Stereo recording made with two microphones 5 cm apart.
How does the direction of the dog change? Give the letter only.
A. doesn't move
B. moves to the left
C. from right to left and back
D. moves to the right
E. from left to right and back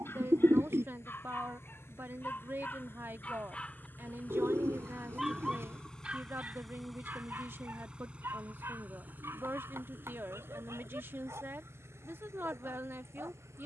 D.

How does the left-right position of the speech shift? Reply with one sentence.
You can hear the speech stay put.